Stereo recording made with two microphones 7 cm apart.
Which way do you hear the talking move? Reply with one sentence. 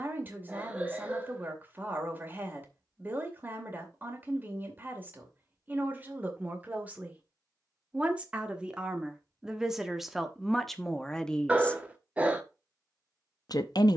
In this clip you hear the talking move from right to left.